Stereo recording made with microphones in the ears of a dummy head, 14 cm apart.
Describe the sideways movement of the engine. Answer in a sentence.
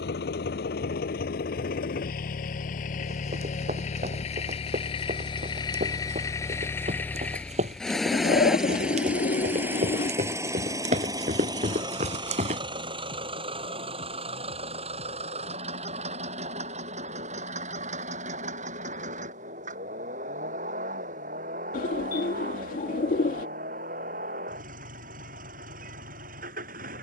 You can hear the engine move from left to right.